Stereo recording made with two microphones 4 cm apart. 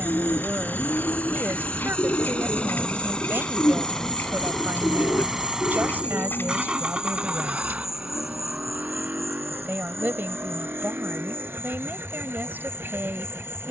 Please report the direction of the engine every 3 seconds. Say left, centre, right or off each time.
left, centre, right, right, right.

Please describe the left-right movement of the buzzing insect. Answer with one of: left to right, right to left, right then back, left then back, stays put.
right to left.